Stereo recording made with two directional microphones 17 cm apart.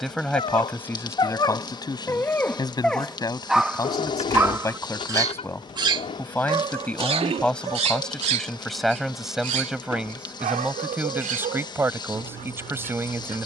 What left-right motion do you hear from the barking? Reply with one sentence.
You can hear the barking move from left to right.